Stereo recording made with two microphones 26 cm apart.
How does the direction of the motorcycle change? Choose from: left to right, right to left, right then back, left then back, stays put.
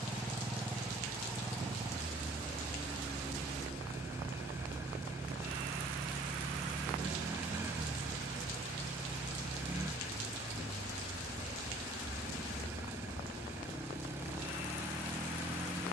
stays put.